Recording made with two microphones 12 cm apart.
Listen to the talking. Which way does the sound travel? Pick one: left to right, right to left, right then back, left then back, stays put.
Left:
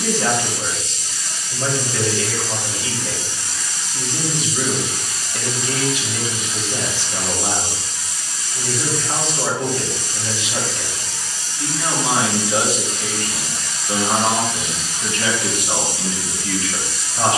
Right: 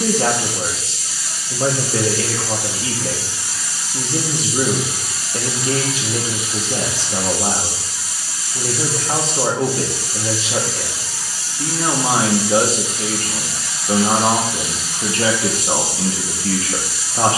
stays put.